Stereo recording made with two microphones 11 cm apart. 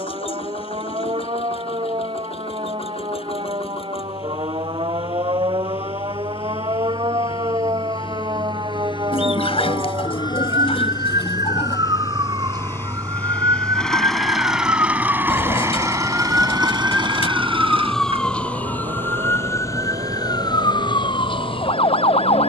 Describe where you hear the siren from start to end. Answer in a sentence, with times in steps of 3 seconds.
You can hear the siren on the right from 0 s, in the centre from 15 s and on the left from 18 s.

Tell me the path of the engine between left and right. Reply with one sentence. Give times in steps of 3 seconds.
You can hear the engine on the left from 0 s, in the centre from 12 s and on the right from 15 s.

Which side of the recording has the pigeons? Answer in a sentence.
In this clip you hear the pigeons on the left.